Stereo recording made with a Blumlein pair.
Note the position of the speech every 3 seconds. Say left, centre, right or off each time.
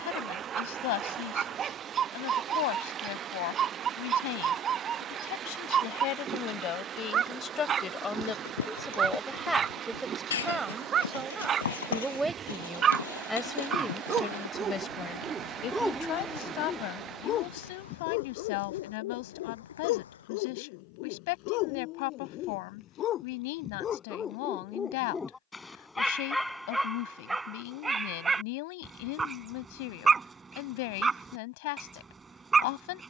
left, left, left, centre, centre, left, left, left, left, left, left.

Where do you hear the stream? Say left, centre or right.
right.